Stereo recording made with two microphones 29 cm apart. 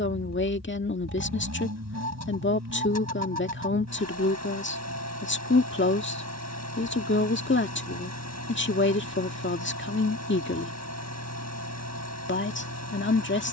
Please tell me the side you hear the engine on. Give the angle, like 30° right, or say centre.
70° right.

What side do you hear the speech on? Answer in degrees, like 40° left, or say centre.
40° left.